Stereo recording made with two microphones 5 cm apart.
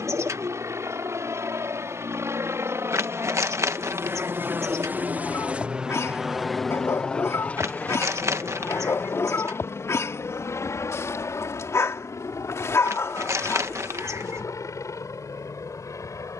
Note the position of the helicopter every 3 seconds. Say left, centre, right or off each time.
right, right, left, left, left, left.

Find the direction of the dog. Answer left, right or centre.
left.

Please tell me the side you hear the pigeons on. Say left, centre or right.
right.